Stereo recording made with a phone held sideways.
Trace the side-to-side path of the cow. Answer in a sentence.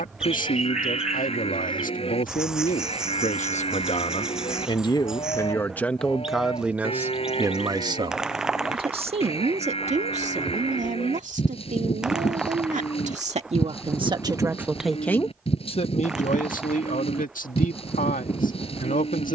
In this clip you hear the cow stay put.